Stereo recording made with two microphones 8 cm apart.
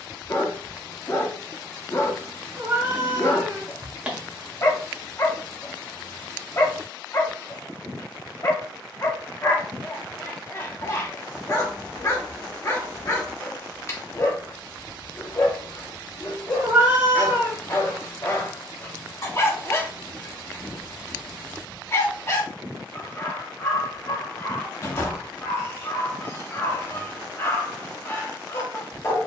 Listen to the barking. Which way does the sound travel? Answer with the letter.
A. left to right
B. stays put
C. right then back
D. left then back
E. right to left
B.